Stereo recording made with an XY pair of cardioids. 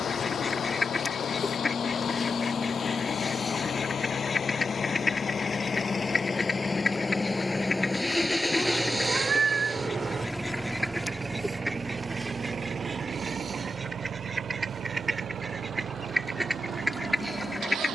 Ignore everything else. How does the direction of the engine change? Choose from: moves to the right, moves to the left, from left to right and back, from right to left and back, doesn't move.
moves to the right.